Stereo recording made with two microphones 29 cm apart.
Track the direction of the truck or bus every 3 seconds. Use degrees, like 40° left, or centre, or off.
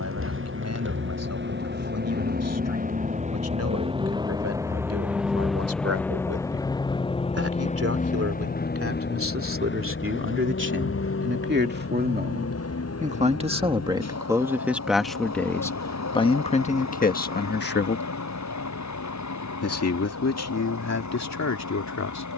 40° right, 10° right, 20° left, 40° left, 60° left, 60° left, 70° left, 70° left.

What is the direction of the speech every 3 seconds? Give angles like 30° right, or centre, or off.
60° right, 60° right, 50° right, 40° right, 20° right, 20° left, 60° left, 70° left.